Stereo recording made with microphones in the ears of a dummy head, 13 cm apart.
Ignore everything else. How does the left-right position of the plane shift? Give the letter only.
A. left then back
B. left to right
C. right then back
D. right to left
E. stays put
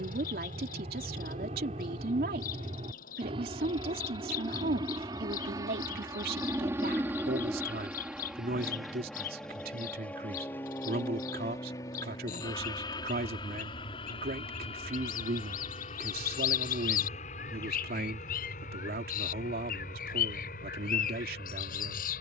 D.